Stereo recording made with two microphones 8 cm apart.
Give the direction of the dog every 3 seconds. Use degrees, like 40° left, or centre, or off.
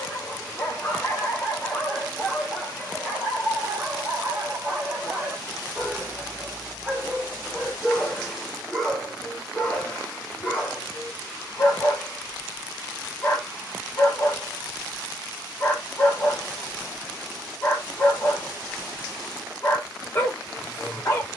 10° left, 20° right, centre, 20° left, 30° left, 30° left, 30° left.